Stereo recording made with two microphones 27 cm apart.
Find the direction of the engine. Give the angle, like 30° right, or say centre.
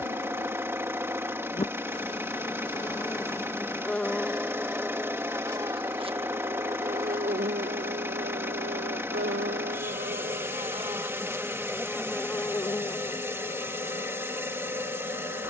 10° right.